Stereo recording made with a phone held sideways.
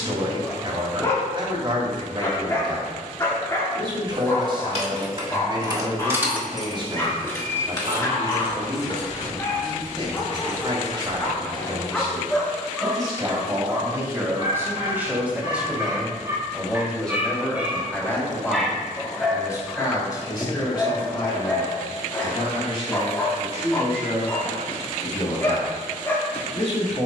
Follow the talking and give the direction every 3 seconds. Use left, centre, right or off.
right, right, right, right, right, centre, left, left, left.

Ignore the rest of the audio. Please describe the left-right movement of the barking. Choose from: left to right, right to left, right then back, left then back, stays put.
right then back.